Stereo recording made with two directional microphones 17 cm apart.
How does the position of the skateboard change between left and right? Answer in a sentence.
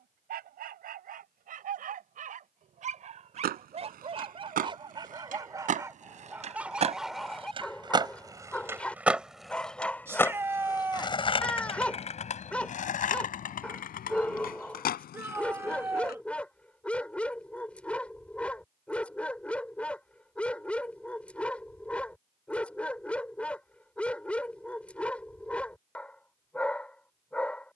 In this clip you hear the skateboard move to the left.